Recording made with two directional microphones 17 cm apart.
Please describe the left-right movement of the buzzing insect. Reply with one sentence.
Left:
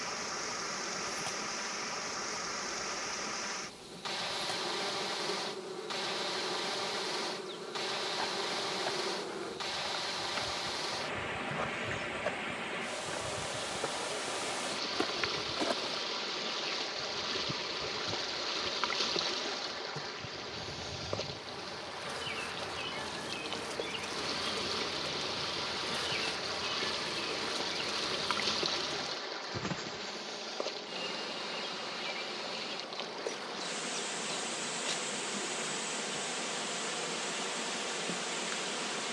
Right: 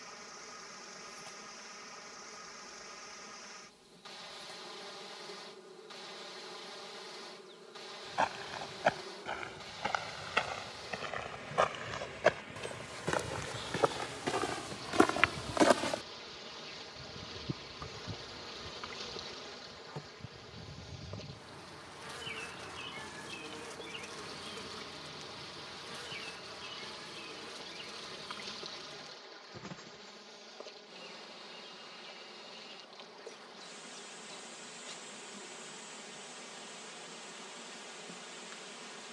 In this clip you hear the buzzing insect move from left to right and back again.